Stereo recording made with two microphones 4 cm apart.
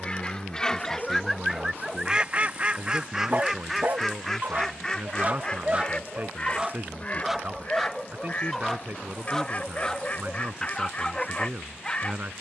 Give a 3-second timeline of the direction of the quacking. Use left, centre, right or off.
centre, centre, left, left.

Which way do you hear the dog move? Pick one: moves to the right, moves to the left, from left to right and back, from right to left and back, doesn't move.
from left to right and back.